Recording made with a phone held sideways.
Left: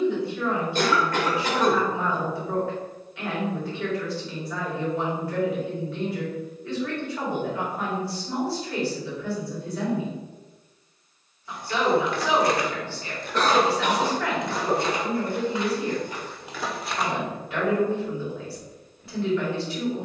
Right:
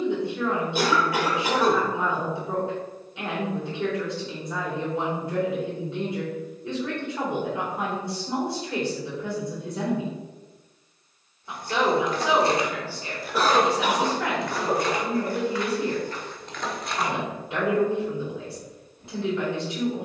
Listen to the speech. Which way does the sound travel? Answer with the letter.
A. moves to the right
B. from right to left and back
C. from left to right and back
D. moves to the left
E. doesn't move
E.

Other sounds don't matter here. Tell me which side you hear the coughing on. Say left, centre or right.
centre.